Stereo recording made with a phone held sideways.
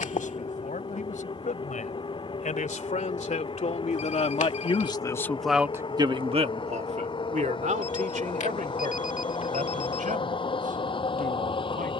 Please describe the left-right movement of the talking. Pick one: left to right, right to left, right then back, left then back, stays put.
left to right.